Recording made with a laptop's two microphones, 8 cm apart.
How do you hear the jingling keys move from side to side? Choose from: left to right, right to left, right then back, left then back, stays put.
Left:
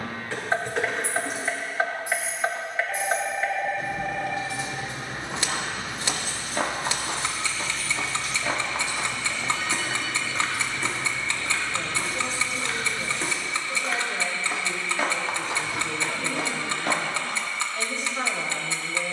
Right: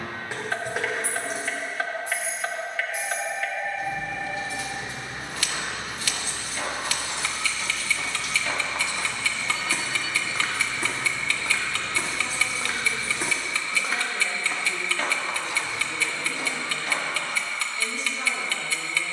left then back.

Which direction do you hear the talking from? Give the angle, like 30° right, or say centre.
60° left.